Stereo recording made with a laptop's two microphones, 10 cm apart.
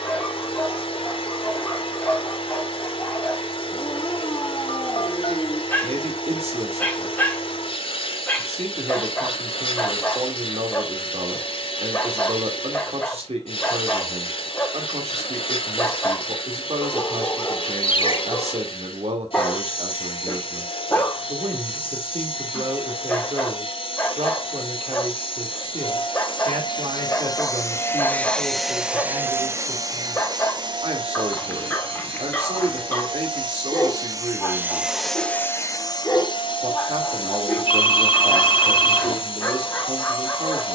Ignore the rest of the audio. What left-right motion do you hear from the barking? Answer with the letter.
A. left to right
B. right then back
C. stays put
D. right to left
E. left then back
C.